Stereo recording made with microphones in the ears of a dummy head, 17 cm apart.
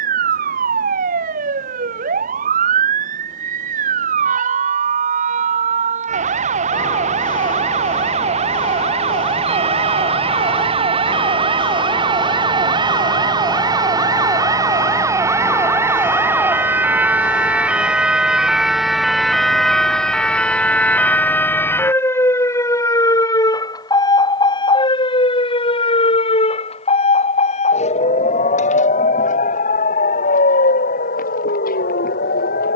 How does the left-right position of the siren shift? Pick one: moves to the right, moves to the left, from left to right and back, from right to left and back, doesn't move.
moves to the left.